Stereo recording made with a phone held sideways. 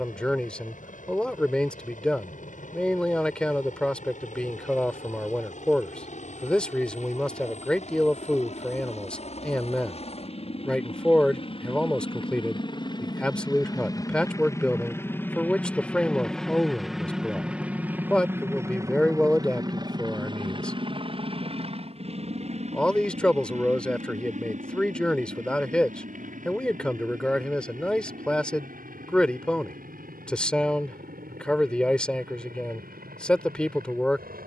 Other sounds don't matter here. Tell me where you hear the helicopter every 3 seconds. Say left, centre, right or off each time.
left, left, left, left, left, centre, right, right, right, right, right, right.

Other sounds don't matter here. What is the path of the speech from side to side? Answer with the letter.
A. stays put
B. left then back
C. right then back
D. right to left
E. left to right
A.